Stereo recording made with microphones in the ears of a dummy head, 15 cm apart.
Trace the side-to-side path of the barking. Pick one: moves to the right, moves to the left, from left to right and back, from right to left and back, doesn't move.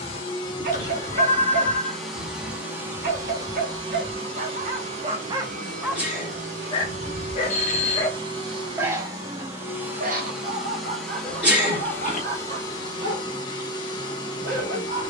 from right to left and back.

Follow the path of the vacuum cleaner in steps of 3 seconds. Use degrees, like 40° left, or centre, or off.
10° left, 30° right, 30° right, centre, 20° left.